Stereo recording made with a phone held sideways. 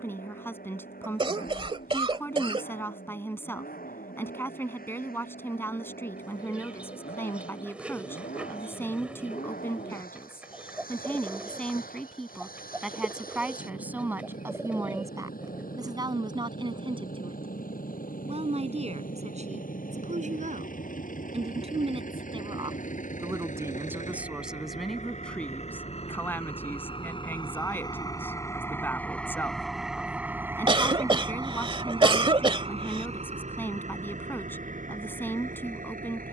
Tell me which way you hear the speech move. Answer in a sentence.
You can hear the speech move from left to right and back again.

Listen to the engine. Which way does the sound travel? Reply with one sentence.
You can hear the engine move to the right.